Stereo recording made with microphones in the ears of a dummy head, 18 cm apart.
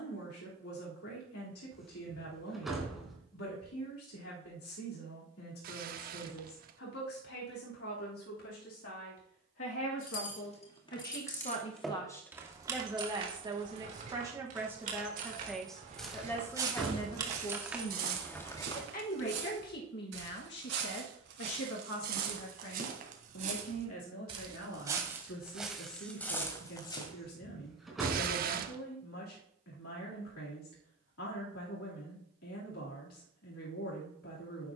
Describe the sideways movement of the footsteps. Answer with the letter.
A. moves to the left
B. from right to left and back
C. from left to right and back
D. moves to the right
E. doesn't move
C.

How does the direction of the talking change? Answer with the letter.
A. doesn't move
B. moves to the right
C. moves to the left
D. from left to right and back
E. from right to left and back
D.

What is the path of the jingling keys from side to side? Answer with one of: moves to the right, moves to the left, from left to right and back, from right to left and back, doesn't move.
from left to right and back.